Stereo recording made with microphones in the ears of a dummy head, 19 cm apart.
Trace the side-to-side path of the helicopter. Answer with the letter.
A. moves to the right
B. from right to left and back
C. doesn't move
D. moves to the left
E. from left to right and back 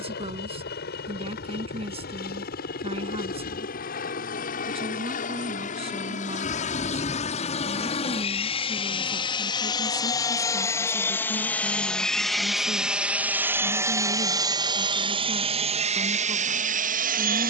A.